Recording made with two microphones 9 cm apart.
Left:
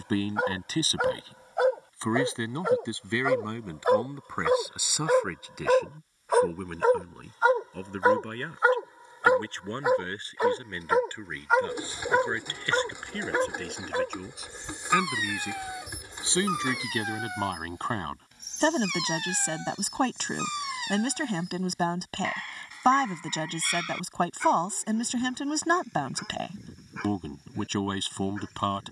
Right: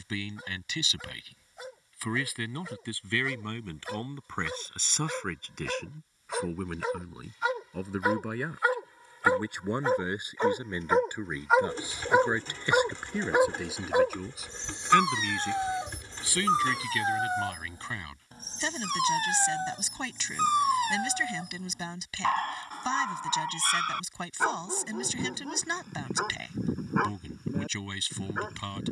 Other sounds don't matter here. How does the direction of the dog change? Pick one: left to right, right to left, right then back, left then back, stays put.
left to right.